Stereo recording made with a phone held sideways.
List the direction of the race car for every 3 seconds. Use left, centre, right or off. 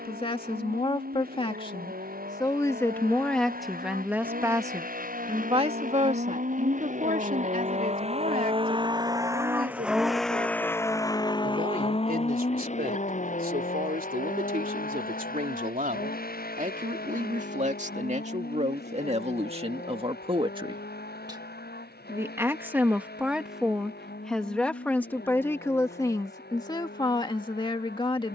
right, right, right, centre, left, left, left, left, left, left.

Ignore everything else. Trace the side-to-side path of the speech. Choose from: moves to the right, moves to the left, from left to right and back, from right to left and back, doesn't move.
from left to right and back.